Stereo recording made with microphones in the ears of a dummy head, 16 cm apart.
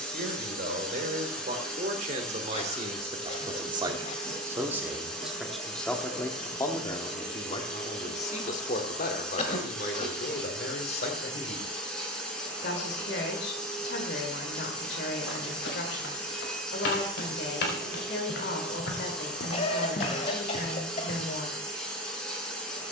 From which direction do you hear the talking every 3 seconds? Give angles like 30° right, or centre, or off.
40° right, 10° right, 30° left, 60° left, 60° left, 60° left, 60° left, 60° left.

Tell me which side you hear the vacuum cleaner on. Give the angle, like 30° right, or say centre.
centre.